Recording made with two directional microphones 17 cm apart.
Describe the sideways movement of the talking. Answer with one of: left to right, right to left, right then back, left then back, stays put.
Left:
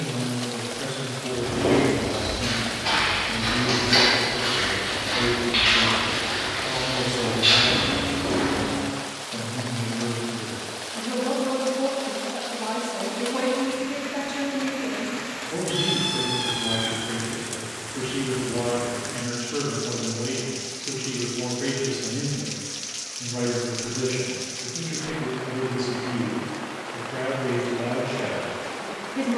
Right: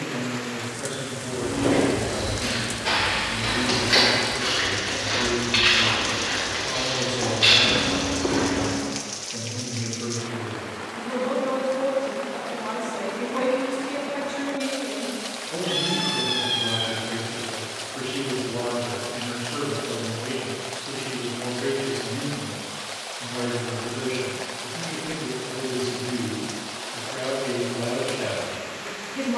stays put.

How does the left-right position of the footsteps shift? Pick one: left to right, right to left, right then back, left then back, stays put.
left to right.